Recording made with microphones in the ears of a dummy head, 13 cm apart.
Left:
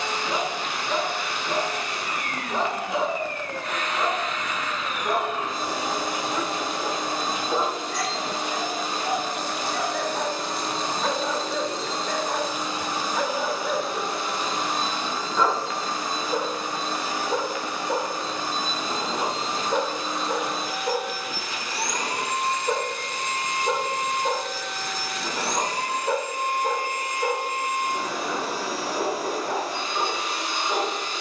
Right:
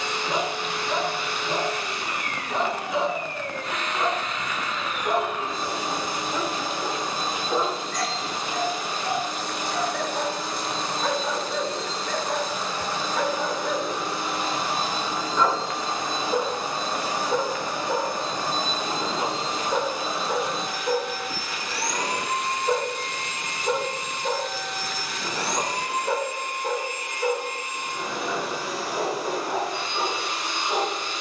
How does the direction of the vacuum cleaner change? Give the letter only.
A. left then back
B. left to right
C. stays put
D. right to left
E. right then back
E.